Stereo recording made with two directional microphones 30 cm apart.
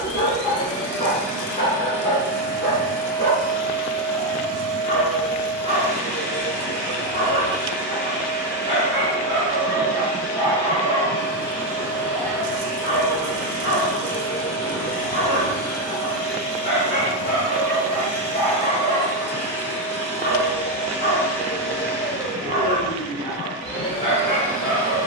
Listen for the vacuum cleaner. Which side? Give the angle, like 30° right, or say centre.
centre.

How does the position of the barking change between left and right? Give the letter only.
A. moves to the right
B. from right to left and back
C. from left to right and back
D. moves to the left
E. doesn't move
E.